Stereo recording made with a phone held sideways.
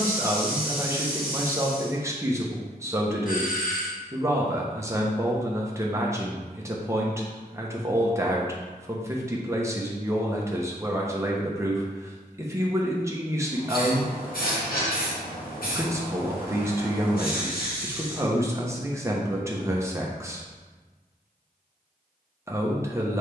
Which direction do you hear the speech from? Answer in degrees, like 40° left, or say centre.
20° right.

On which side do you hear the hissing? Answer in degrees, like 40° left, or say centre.
70° left.